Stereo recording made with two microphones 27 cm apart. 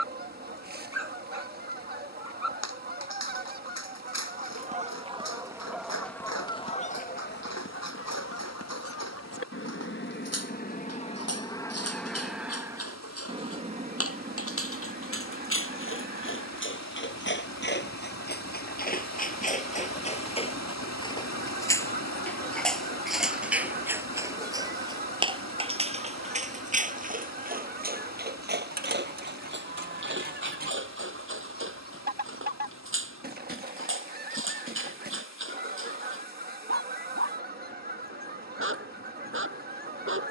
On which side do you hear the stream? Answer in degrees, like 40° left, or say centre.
70° left.